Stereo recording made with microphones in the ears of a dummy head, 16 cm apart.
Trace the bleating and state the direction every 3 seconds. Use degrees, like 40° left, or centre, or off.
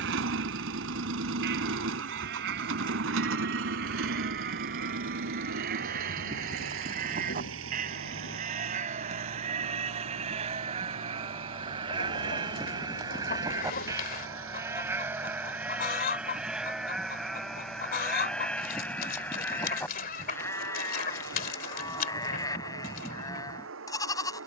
60° right, 50° right, 40° right, 30° right, 20° right, centre, 10° left, 20° left.